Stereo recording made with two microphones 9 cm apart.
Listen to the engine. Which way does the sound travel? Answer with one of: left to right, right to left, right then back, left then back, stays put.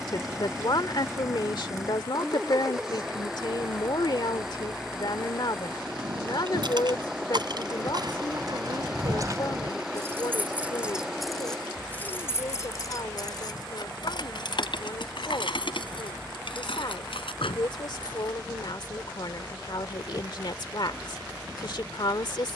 stays put.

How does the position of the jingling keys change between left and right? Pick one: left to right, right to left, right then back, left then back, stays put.
right to left.